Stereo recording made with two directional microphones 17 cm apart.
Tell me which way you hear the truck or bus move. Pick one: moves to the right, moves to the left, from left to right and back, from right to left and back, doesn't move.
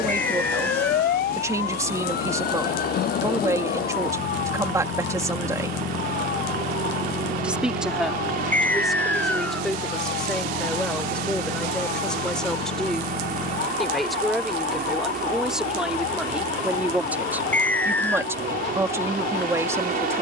doesn't move.